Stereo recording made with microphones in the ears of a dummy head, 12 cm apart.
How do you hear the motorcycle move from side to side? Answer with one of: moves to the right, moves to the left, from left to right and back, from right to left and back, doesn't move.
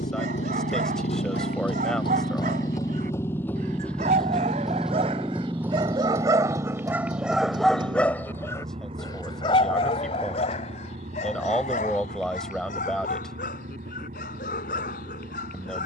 moves to the right.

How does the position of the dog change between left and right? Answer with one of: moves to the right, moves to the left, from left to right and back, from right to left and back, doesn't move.
moves to the left.